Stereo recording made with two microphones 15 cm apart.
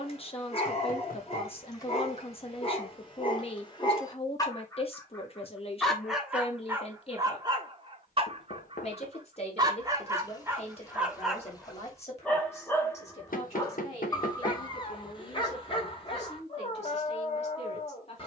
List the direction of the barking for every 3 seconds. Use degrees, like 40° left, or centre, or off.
40° left, 20° left, 20° right, 10° right, 20° left, 30° left.